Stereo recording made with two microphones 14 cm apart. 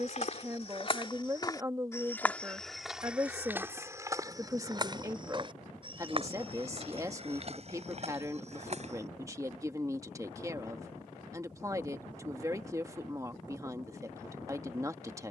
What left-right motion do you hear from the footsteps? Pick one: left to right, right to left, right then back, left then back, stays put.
left to right.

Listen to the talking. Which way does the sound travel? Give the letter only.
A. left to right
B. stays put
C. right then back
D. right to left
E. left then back
B.